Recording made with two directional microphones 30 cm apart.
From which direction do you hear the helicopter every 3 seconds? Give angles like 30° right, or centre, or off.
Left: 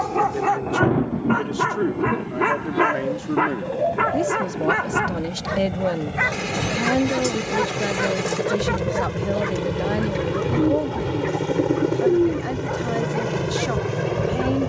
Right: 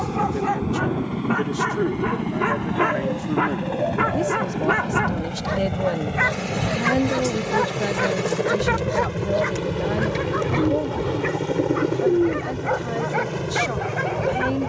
50° right, 40° right, 30° right, centre, 30° left.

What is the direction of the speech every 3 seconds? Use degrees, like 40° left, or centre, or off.
20° left, 10° left, centre, 10° left, 20° left.